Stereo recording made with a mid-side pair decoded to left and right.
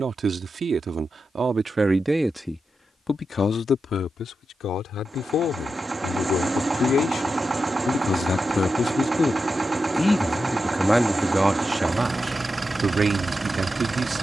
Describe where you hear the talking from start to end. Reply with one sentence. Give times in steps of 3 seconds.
You can hear the talking on the right from 0 s, on the left from 3 s, in the centre from 9 s and on the right from 12 s.